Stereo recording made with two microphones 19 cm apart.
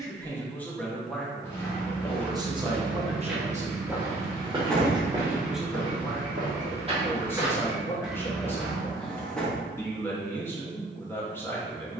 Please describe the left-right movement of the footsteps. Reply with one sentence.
In this clip you hear the footsteps go right and come back.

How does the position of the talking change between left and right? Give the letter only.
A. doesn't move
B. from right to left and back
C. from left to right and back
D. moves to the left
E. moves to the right
C.